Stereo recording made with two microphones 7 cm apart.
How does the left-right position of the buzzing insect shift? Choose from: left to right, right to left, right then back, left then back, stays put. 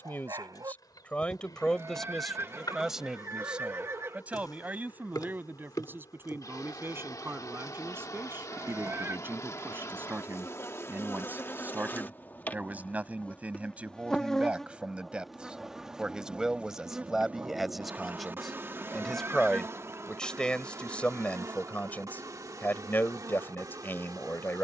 left to right.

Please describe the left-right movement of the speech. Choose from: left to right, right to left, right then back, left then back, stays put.
right then back.